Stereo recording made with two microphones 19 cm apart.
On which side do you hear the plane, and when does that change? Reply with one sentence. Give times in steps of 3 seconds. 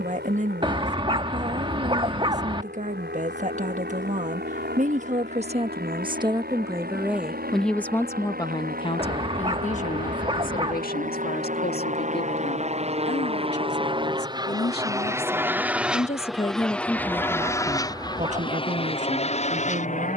You can hear the plane on the right from 0 s, in the centre from 15 s and on the left from 18 s.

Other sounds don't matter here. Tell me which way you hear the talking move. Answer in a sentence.
In this clip you hear the talking go left and come back.